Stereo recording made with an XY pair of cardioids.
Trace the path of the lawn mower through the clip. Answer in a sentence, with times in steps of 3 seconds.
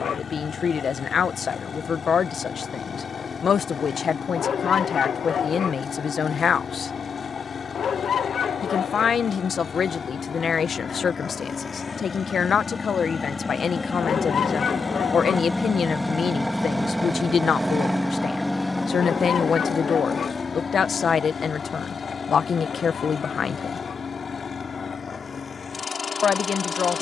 You can hear the lawn mower on the left from 0 s, in the centre from 15 s and on the left from 18 s.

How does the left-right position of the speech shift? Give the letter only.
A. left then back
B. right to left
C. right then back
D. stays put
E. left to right
D.